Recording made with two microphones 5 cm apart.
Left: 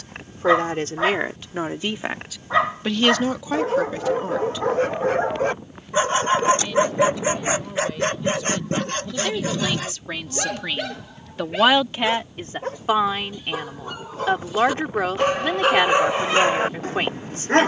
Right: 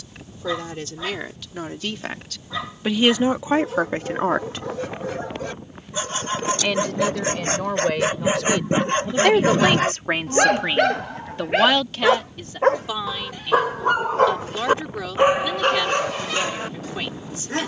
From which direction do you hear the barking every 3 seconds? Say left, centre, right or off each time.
left, left, centre, right, right, left.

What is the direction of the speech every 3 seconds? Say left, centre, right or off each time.
left, right, right, right, left, left.